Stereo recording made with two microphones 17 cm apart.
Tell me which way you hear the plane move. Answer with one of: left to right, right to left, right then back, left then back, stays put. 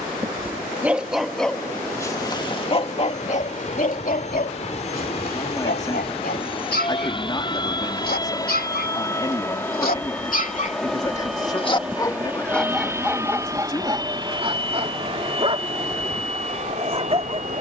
left to right.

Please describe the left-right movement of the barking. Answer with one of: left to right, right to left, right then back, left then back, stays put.
left then back.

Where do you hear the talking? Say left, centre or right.
left.